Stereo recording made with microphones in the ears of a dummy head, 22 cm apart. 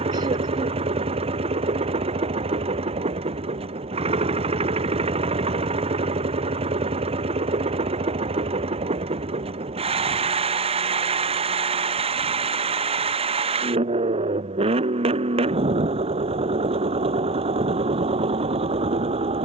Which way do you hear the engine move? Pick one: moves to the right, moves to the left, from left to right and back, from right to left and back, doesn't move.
doesn't move.